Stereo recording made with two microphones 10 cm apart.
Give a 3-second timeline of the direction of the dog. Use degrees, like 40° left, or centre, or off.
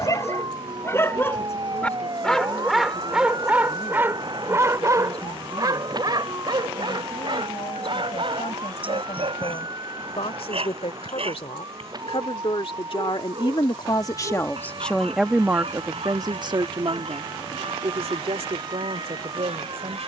20° left, 20° right, 50° right, 60° right, 70° right, 70° right, 80° right.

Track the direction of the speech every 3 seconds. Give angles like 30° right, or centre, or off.
80° left, 80° left, 80° left, 70° left, 40° left, 40° right, 70° right.